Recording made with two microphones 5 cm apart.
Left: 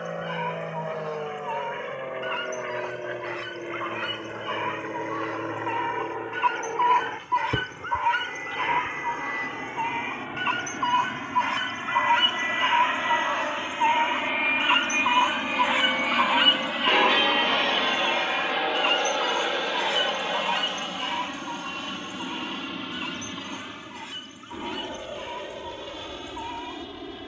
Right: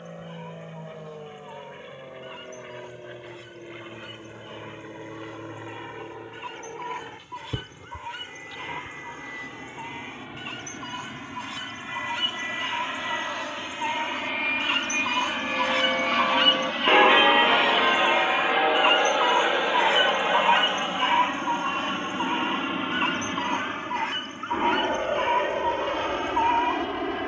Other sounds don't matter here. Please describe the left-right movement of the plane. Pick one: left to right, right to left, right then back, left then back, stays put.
left to right.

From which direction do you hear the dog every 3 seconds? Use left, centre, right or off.
left, left, left, left, left, centre, right, right, right.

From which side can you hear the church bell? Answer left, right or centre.
right.